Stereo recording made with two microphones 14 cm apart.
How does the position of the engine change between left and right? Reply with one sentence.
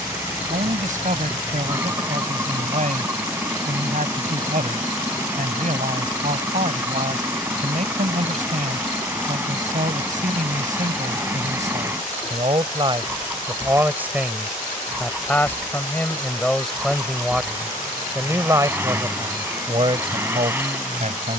In this clip you hear the engine stay in one place.